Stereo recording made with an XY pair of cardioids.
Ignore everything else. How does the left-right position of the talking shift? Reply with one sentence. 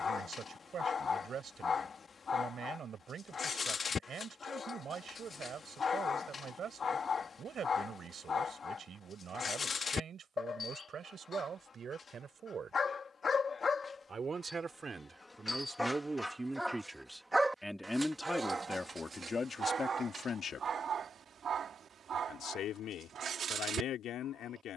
You can hear the talking go from the right side to the left.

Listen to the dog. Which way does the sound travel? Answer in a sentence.
You can hear the dog move to the right.